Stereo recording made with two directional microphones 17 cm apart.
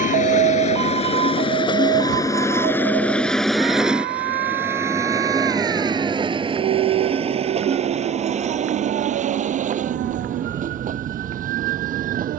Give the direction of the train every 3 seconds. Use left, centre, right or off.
left, centre, right, right.